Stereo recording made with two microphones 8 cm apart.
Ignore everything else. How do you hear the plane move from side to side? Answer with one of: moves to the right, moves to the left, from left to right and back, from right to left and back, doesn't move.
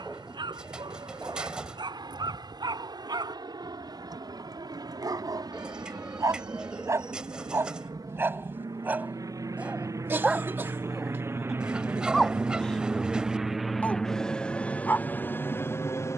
moves to the left.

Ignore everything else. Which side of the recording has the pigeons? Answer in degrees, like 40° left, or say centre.
10° right.